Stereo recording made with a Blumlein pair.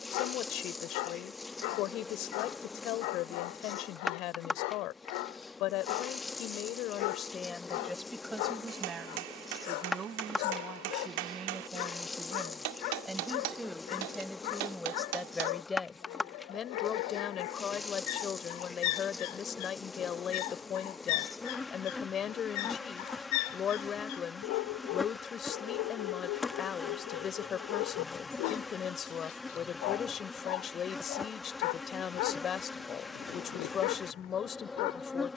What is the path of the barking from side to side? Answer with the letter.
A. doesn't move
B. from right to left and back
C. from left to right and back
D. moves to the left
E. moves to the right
A.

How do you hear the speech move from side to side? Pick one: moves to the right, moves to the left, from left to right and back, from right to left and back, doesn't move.
from left to right and back.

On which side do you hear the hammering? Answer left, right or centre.
right.